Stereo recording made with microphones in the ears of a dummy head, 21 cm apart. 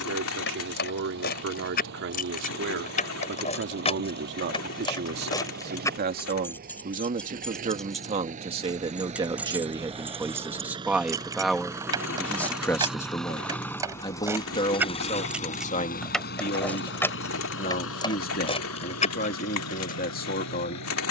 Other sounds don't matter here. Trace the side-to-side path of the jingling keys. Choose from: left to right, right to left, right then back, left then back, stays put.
right then back.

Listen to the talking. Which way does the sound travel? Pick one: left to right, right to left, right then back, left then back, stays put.
right to left.